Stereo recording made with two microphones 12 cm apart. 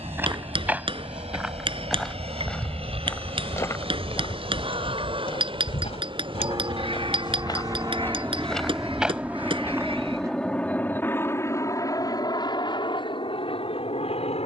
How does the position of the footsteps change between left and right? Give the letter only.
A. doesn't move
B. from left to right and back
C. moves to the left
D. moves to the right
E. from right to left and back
E.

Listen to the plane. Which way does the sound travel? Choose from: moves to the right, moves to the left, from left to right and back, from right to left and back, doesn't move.
moves to the left.